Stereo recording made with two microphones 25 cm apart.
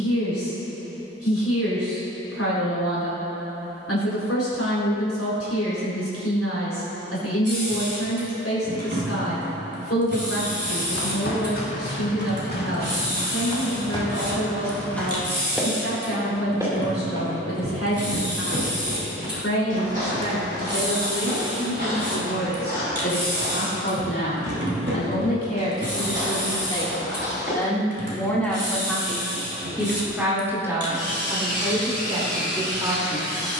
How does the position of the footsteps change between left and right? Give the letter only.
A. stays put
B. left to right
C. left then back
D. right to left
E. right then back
B.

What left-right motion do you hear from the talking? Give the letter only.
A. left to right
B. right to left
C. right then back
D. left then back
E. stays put
A.